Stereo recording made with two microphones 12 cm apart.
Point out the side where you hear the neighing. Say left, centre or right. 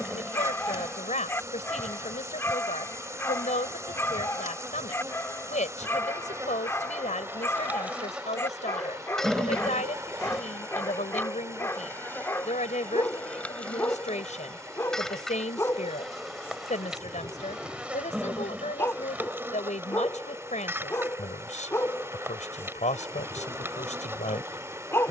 centre.